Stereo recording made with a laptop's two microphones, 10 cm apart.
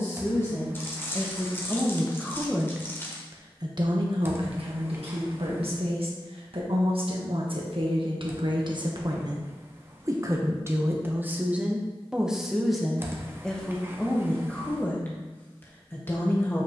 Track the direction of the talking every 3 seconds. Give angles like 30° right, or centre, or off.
10° left, 70° right, 60° right, 30° right, 10° left, 20° left.